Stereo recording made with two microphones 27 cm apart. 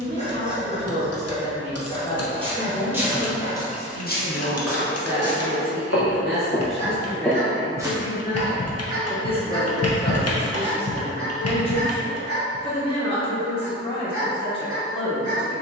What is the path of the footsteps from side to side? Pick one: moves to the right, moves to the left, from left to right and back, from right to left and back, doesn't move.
from right to left and back.